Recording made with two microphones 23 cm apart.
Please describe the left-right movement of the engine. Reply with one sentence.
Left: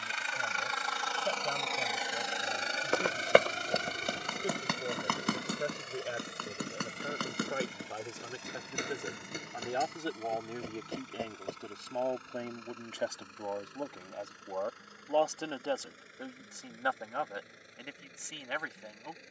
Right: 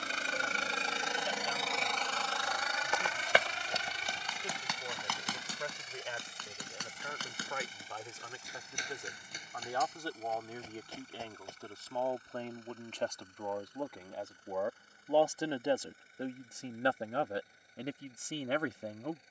You can hear the engine go from the right side to the left.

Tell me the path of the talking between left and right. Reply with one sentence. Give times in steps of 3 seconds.
In this clip you hear the talking on the left from 0 s, in the centre from 12 s and on the right from 15 s.